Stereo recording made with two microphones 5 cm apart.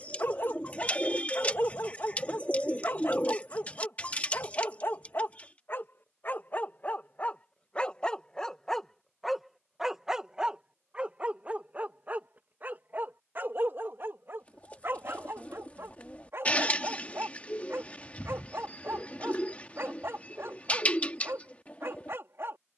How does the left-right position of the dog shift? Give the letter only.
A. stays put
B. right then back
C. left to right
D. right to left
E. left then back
C.